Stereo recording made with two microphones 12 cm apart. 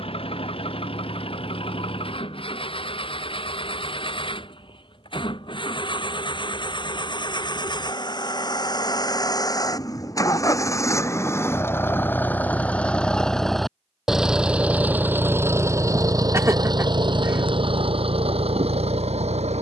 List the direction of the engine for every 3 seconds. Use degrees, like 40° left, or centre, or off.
50° left, 50° left, 40° left, 30° left, centre, 30° right, 60° right.